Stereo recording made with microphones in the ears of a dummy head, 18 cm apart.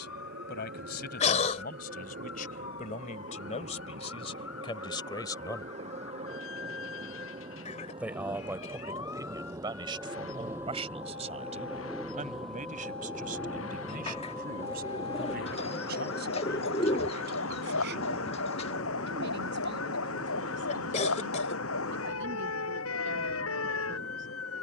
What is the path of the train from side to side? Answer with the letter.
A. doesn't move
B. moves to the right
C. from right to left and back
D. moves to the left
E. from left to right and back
D.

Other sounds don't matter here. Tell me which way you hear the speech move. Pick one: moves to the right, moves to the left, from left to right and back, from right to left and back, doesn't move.
moves to the right.